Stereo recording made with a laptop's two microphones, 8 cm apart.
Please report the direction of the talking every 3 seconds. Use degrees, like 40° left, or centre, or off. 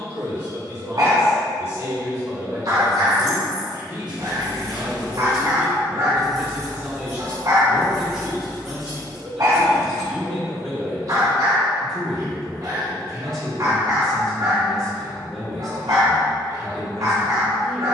40° right, 40° right, 10° right, 10° left, 10° left, 10° left.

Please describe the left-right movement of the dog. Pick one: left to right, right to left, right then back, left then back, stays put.
stays put.